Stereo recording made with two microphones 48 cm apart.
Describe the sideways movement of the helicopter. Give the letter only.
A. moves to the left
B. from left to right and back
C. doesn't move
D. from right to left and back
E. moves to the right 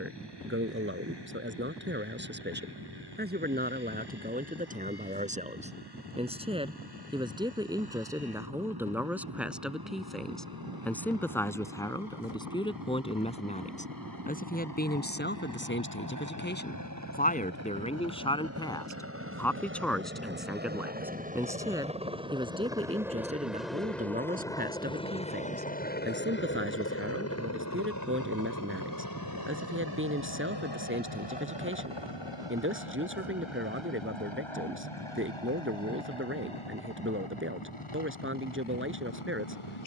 A.